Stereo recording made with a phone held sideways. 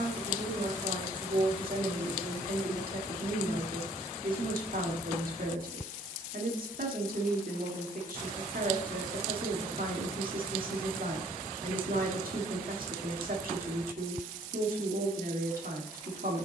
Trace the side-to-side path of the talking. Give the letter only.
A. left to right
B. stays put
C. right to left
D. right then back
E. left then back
B.